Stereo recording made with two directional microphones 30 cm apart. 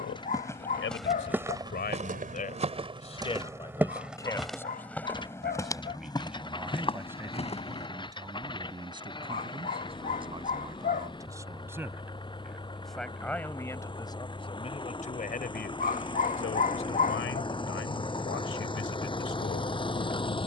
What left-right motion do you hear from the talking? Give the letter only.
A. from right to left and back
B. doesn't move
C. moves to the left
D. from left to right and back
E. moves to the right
D.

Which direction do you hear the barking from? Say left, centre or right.
left.